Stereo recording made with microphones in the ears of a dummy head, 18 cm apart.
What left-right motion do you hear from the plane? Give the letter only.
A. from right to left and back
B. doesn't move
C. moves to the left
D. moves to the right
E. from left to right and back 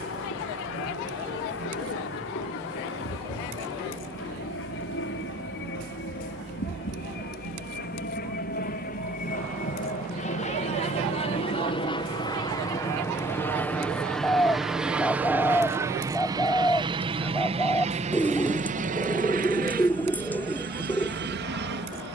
D.